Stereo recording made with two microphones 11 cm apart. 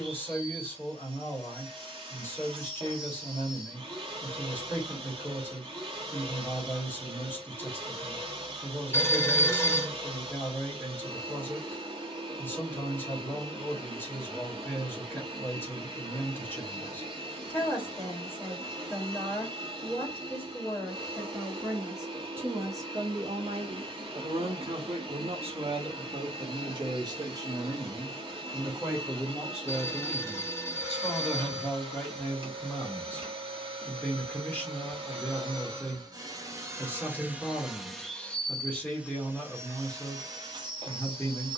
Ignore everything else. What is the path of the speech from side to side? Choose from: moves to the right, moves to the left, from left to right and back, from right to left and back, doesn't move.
from left to right and back.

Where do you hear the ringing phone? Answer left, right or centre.
left.